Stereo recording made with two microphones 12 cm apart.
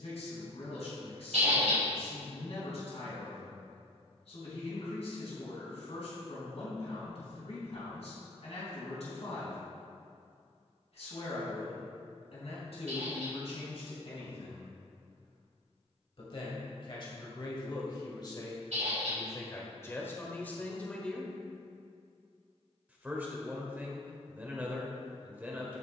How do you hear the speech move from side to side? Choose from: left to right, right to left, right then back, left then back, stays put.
left to right.